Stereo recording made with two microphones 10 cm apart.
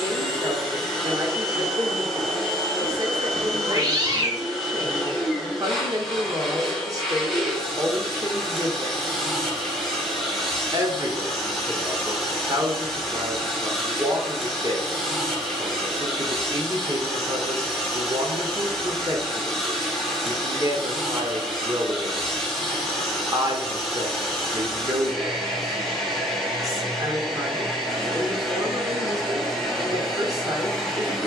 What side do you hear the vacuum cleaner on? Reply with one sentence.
In this clip you hear the vacuum cleaner in the centre.